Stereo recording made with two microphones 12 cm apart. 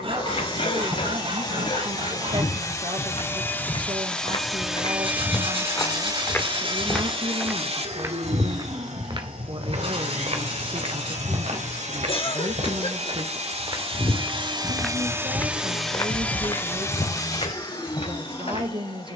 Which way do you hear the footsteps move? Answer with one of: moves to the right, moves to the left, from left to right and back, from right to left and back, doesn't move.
from left to right and back.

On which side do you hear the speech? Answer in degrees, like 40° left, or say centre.
40° right.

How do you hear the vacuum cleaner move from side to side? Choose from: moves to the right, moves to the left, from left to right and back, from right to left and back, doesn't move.
from left to right and back.